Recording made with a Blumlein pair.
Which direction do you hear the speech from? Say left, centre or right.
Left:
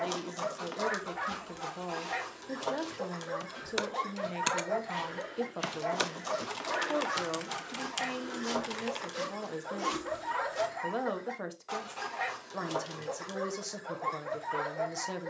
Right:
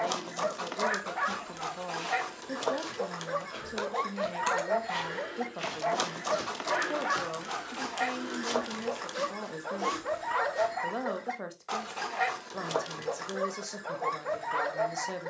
centre.